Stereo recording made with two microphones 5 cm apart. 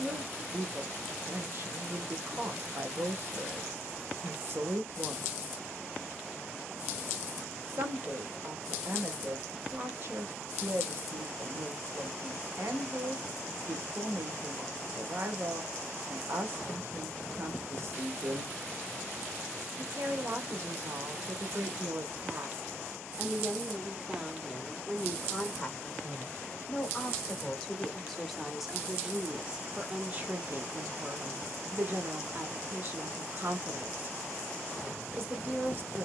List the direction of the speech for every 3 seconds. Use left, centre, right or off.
right, right, right, right, right, right, right, right, centre, centre, right, right.